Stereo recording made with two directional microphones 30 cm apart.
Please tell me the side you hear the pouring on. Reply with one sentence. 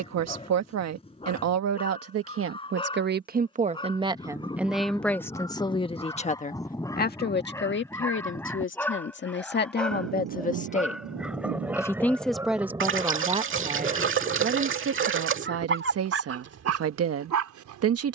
You can hear the pouring on the right.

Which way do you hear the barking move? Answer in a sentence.
You can hear the barking travel towards the right.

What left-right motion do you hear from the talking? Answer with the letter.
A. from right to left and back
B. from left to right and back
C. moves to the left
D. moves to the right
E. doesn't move
A.